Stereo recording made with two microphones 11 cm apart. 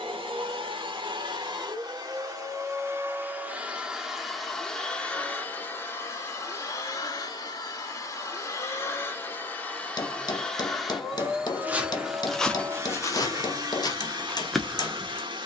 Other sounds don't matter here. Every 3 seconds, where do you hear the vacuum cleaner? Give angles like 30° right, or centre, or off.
40° right, centre, 30° left, centre, 40° right.